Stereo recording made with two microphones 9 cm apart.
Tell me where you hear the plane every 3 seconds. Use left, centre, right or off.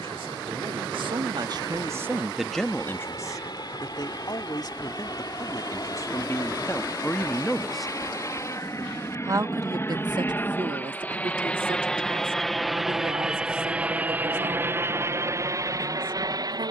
left, left, left, left, centre, right.